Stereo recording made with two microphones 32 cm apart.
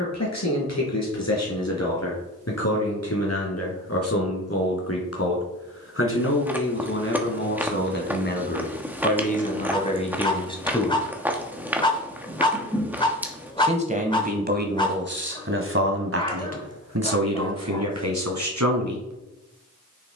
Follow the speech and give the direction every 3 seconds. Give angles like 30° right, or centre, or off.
50° left, 50° left, 40° left, 20° left, 30° right, 50° right, 60° right.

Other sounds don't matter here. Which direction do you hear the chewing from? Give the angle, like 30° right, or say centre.
10° right.